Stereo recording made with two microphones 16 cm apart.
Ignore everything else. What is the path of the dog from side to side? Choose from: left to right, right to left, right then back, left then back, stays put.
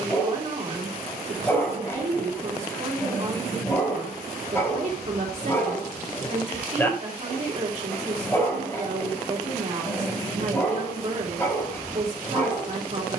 stays put.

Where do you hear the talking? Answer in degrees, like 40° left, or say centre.
50° right.